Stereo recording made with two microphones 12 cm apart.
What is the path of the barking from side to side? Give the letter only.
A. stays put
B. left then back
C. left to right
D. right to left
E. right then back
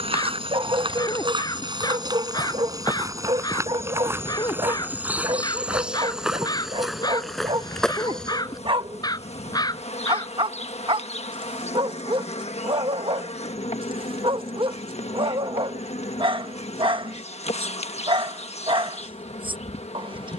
A.